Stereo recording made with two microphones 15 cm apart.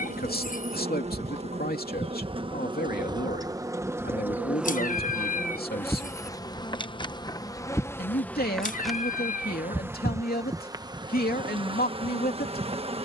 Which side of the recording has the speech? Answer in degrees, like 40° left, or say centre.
70° left.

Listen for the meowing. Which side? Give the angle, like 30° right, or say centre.
60° left.